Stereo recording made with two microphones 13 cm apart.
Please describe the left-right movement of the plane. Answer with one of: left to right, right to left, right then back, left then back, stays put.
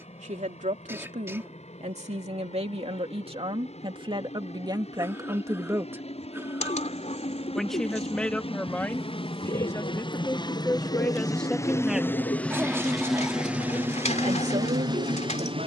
left to right.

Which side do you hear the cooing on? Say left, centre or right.
left.